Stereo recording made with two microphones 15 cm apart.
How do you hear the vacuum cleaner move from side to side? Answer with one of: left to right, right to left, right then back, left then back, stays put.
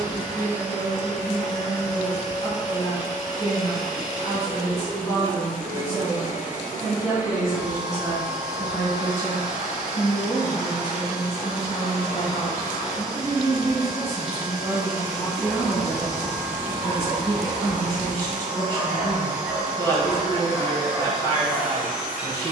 stays put.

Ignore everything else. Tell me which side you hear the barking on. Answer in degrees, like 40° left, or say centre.
centre.